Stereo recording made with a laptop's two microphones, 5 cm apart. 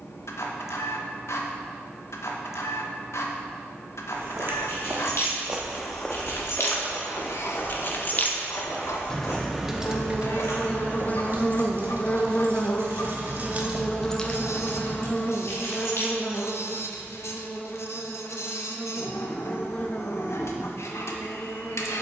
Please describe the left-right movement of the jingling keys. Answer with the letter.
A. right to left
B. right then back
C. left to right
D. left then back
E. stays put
B.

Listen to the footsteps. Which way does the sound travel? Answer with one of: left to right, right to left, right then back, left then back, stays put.
right to left.